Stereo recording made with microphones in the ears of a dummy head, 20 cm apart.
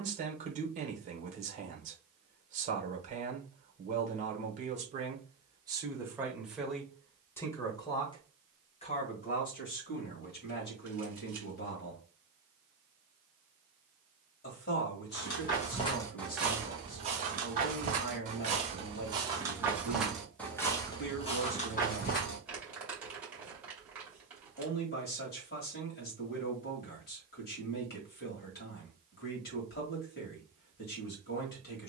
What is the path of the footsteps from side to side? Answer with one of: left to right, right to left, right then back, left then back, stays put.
right then back.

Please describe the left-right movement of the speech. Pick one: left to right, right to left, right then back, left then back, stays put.
right to left.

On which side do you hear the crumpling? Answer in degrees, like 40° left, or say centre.
10° right.